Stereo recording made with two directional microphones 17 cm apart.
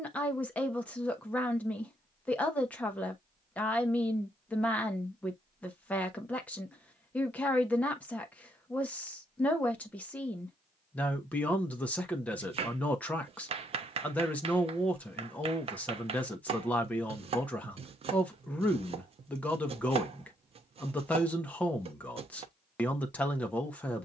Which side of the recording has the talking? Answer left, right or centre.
centre.